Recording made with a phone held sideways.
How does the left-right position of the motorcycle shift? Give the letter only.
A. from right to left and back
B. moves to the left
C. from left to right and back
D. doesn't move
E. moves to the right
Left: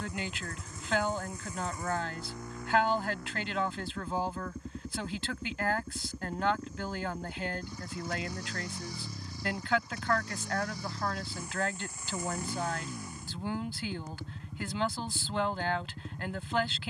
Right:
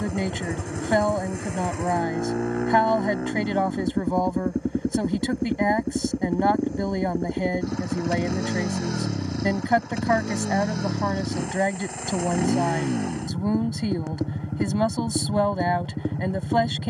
D.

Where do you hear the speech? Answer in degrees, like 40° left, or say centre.
50° right.